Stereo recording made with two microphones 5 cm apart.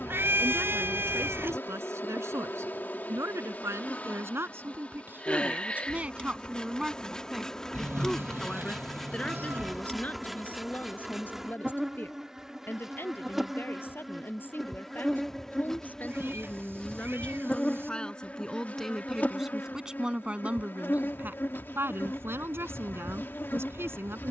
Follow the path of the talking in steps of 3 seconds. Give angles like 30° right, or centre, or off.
60° right, 50° right, centre, 30° left, 40° left, 30° left, 10° right, 50° right.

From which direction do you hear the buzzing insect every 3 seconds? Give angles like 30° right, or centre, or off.
40° left, 30° left, 10° left, centre, centre, 10° left, 30° left, 40° left.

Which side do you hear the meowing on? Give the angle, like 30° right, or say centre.
50° right.